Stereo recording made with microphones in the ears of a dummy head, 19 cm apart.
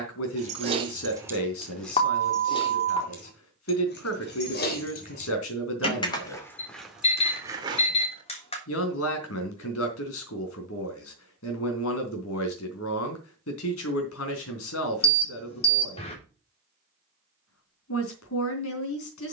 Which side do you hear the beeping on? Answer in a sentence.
In this clip you hear the beeping on the left.